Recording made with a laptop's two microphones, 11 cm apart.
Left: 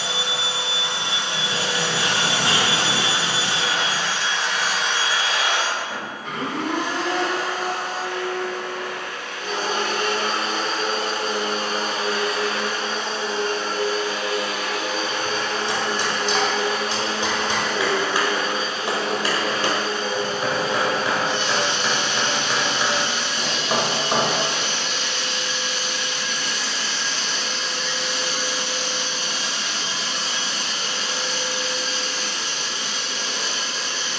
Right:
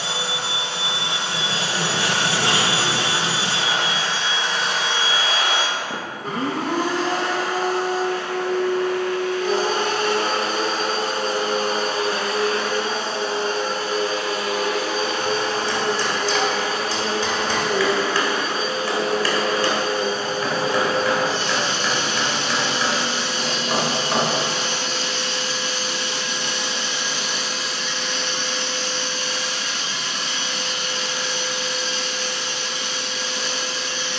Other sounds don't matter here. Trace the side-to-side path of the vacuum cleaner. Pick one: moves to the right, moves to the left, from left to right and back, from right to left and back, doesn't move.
moves to the left.